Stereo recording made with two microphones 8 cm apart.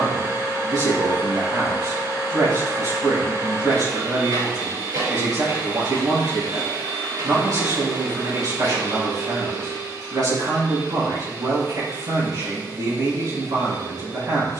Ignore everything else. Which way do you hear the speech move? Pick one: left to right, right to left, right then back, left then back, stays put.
stays put.